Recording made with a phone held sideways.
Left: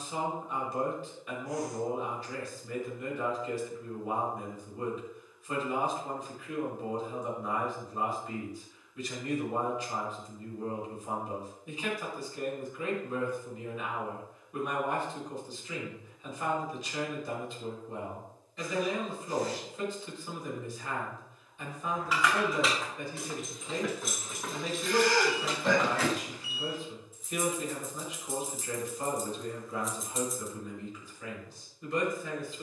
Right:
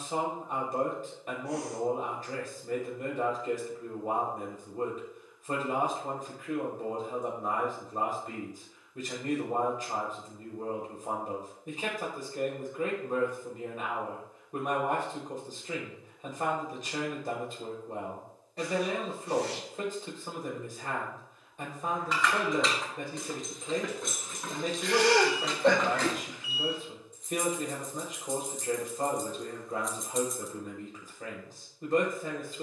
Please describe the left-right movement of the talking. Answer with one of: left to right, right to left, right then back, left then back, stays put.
stays put.